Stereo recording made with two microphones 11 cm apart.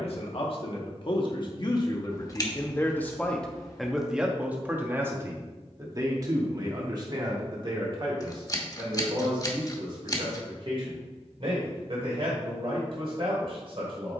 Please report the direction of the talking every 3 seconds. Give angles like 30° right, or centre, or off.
40° left, 10° right, 40° right, 50° right, 60° right.